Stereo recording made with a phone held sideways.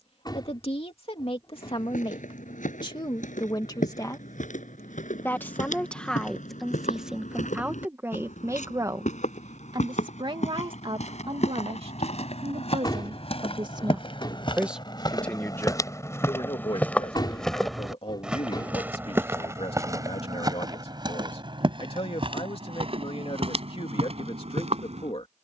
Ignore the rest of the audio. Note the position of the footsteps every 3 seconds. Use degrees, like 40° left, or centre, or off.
80° left, 80° left, 70° left, 60° left, 50° left, 20° left, 20° right, 40° right, 50° right.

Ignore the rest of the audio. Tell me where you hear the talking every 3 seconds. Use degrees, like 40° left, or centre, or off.
40° left, 20° left, 10° right, 40° right, 40° right, 30° left, 50° left, 50° left, 50° left.